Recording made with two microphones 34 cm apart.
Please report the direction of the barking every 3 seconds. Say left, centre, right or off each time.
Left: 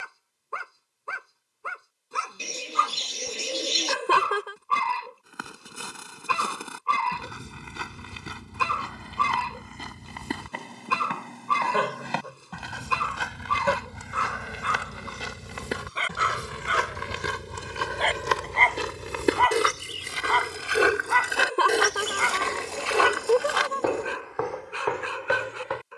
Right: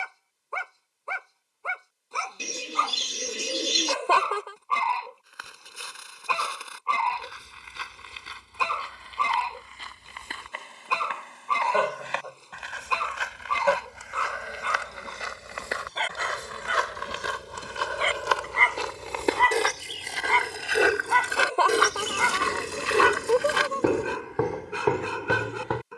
left, left, left, left, left, centre, right, right, right.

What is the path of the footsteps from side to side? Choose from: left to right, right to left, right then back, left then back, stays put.
left to right.